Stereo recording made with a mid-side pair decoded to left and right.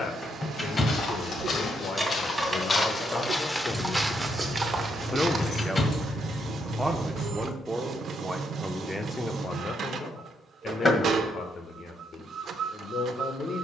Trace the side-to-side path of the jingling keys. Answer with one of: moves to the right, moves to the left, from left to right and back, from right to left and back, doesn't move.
moves to the left.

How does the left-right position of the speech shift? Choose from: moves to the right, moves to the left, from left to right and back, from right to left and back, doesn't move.
from left to right and back.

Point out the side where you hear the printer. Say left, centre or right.
right.